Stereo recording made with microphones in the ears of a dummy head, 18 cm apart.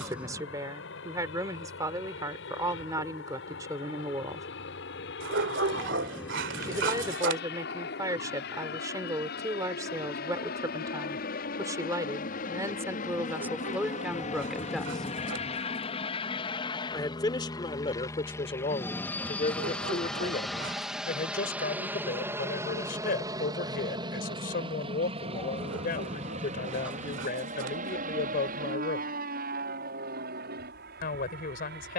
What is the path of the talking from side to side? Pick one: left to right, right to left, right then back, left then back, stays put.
right to left.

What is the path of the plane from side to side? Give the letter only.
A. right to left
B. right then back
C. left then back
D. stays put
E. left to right
E.